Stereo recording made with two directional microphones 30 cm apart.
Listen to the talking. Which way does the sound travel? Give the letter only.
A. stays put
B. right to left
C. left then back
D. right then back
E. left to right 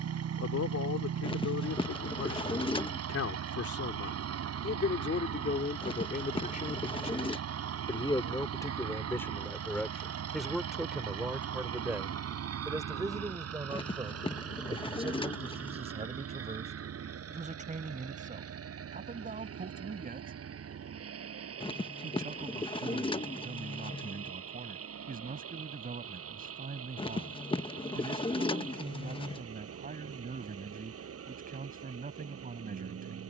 E.